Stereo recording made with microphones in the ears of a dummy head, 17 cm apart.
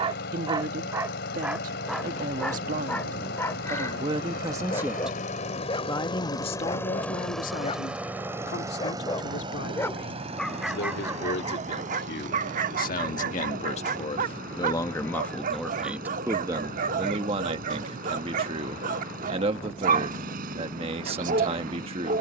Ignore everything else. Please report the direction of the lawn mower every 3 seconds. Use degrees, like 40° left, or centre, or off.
60° left, 50° left, centre, 30° right, 50° right, 50° right, 50° right, 50° right.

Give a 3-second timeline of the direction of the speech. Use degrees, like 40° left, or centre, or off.
40° right, 20° right, 40° left, 60° left, 40° left, 20° right, 30° right, 30° right.